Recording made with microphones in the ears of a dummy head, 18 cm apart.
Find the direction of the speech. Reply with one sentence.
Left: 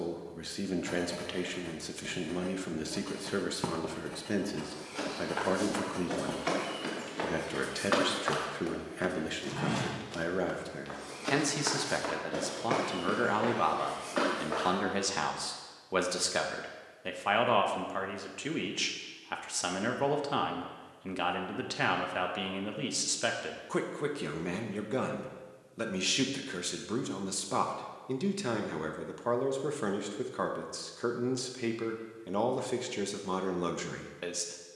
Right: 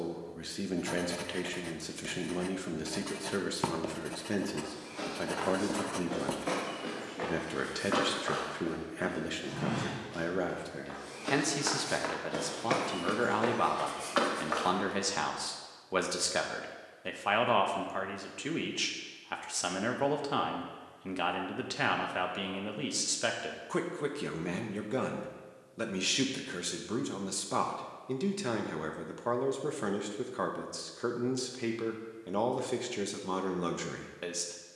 In this clip you hear the speech in the centre.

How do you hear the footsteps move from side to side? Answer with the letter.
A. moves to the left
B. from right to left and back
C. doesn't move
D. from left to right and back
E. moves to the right
E.